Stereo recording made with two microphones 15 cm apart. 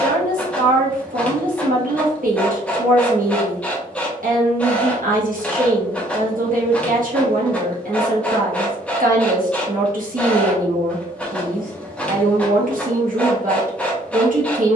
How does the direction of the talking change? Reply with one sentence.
You can hear the talking stay put.